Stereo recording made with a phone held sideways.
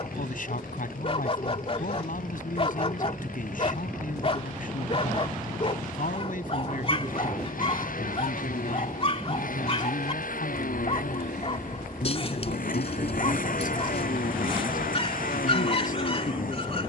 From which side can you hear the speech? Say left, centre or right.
left.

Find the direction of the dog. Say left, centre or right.
left.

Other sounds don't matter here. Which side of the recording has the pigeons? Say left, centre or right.
left.